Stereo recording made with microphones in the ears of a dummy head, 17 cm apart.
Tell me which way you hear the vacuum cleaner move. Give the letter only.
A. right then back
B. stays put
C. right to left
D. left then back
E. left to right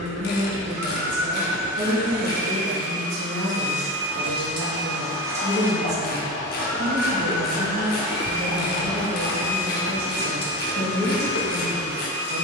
C.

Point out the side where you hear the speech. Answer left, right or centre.
right.